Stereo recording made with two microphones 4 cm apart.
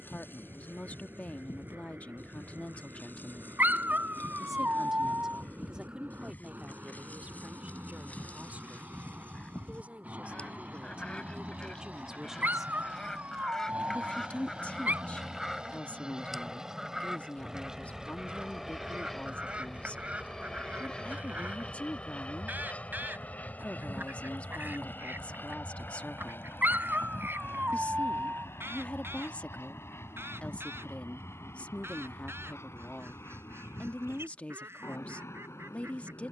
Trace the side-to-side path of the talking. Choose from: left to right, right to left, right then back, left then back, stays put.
right then back.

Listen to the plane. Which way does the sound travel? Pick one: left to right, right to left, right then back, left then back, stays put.
right to left.